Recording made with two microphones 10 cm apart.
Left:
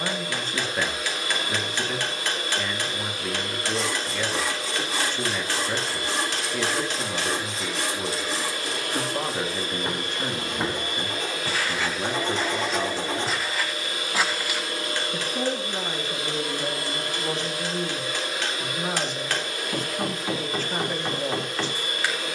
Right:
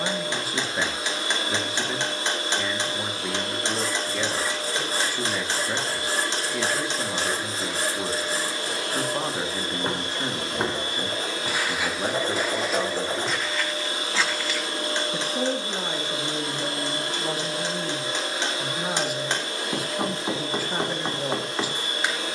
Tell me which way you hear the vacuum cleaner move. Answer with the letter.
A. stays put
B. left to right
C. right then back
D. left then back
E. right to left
A.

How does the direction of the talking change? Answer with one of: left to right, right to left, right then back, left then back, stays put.
stays put.